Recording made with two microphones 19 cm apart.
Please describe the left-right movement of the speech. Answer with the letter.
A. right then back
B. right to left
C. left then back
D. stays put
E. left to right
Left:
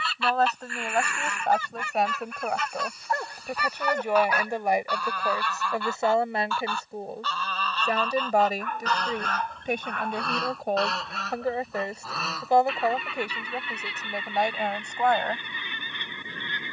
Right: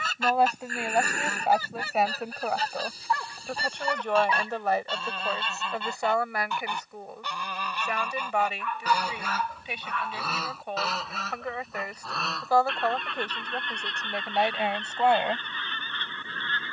C.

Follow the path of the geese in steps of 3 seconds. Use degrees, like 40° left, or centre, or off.
40° right, 30° right, 10° right, centre, 10° left, 10° left.